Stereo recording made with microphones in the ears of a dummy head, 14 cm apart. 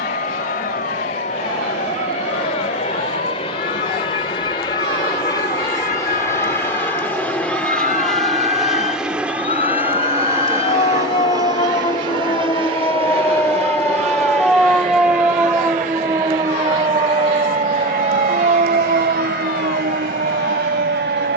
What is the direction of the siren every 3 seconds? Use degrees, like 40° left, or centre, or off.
70° left, 60° left, 50° left, 40° left, 10° left, 20° right, 50° right.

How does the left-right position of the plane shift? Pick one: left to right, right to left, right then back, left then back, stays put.
left to right.